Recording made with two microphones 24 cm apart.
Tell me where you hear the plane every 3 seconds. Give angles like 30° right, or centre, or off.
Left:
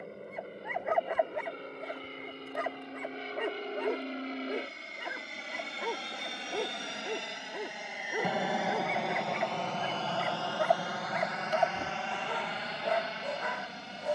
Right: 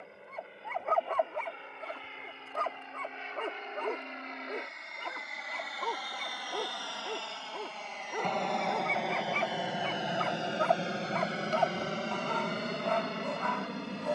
50° left, 40° left, 20° left, 20° right, 50° right.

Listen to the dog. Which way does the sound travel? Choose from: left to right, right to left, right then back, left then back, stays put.
stays put.